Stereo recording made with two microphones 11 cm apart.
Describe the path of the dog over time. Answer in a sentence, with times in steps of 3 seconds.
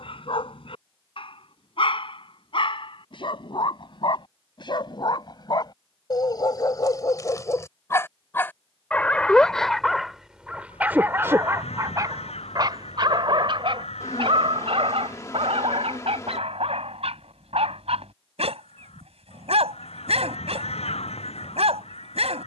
You can hear the dog on the left from 0 s, in the centre from 9 s and on the right from 12 s.